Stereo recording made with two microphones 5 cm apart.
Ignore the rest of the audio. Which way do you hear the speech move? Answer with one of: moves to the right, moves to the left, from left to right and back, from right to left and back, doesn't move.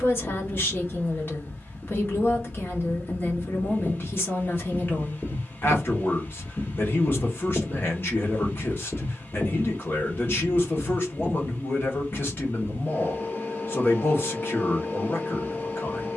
doesn't move.